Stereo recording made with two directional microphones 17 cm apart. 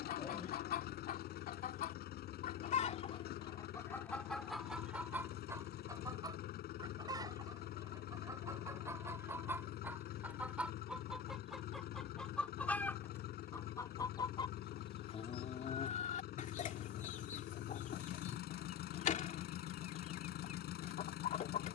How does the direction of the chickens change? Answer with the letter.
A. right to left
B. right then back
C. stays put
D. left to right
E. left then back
B.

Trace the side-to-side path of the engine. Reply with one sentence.
In this clip you hear the engine stay put.